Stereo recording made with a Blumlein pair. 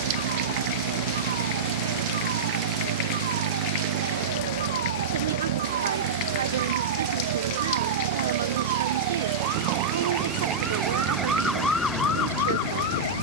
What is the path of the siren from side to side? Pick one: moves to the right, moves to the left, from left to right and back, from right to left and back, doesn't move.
moves to the left.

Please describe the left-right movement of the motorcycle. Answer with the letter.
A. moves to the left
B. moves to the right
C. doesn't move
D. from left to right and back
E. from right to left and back
C.